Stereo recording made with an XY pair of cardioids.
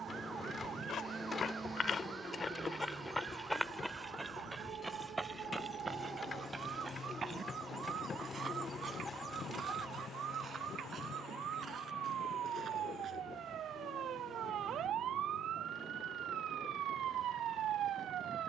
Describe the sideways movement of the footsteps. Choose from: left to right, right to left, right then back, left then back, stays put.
left to right.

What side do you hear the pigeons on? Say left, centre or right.
left.